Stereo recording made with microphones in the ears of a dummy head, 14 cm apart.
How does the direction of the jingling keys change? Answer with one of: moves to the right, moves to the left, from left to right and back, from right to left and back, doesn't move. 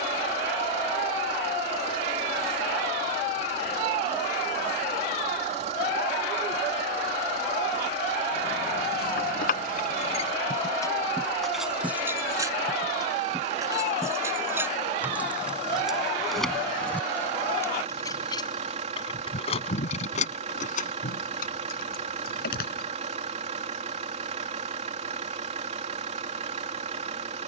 from left to right and back.